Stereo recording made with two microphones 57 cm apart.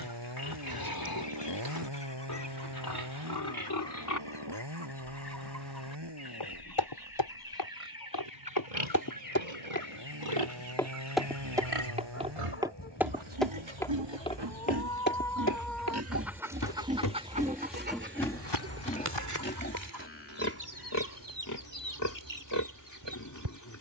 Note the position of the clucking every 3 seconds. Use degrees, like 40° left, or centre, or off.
50° left, 50° left, 40° left, 30° left, 20° left, 10° right, 30° right, 50° right.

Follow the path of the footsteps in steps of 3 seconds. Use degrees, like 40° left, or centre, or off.
off, off, 50° left, 10° left, centre, 30° left, 50° left, off.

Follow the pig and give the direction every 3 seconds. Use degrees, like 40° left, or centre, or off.
40° left, 40° left, 70° right, 80° right, 60° right, 20° right, 20° left, 30° left.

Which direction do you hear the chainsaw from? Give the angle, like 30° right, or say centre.
50° right.